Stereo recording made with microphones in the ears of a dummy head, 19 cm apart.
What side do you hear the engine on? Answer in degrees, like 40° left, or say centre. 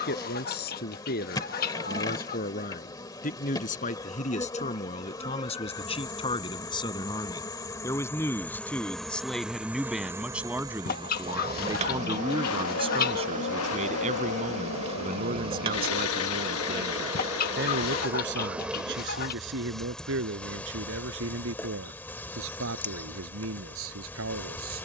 70° left.